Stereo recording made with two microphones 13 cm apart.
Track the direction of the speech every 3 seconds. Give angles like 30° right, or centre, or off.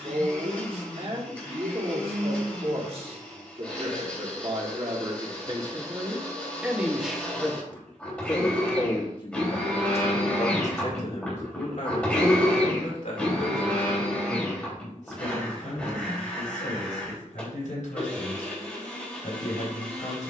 50° right, 40° right, 10° left, 50° left, 70° left, 80° left, 80° left.